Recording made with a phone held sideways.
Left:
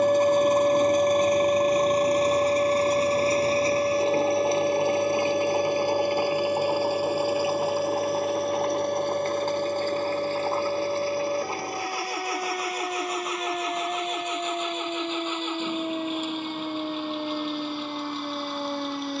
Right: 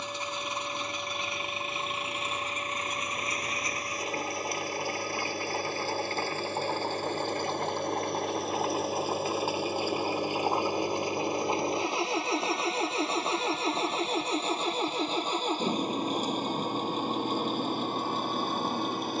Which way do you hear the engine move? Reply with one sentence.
You can hear the engine move to the right.